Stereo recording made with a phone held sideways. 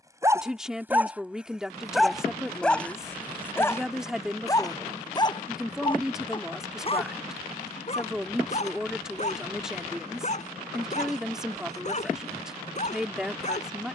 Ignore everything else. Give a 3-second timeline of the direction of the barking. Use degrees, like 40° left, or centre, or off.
10° right, 20° left, 40° left, 50° left, 50° left.